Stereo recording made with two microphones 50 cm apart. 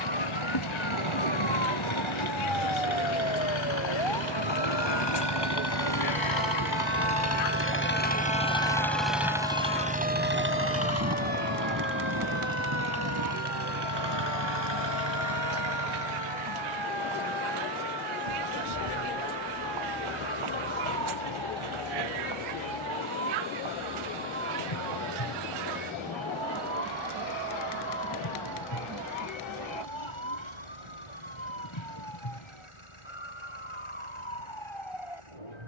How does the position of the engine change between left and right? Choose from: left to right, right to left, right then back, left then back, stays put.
left to right.